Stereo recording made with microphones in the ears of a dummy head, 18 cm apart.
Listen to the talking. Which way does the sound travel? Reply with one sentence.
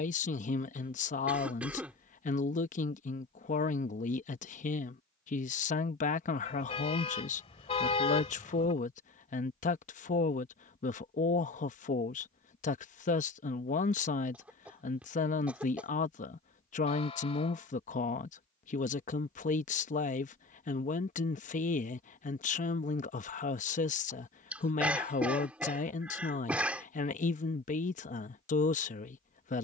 You can hear the talking stay in one place.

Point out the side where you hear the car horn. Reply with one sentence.
In this clip you hear the car horn on the left.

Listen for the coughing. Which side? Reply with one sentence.
You can hear the coughing in the centre.